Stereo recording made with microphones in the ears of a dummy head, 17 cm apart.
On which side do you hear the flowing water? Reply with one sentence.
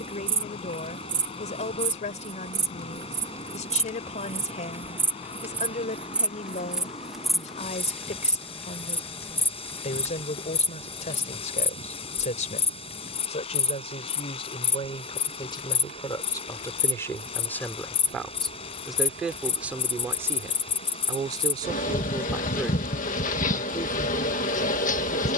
In this clip you hear the flowing water on the left.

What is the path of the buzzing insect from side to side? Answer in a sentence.
You can hear the buzzing insect move from right to left.